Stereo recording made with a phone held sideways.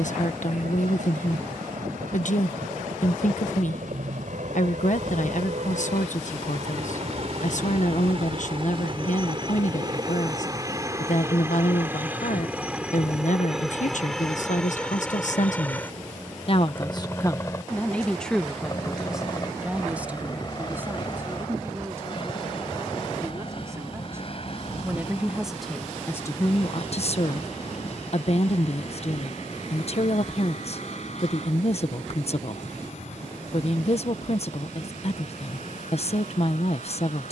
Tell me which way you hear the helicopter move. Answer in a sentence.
You can hear the helicopter move to the left.